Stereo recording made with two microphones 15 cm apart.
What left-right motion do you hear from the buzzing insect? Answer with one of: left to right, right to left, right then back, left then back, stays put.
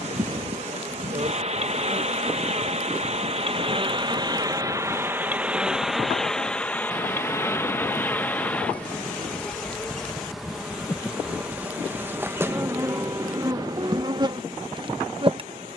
left then back.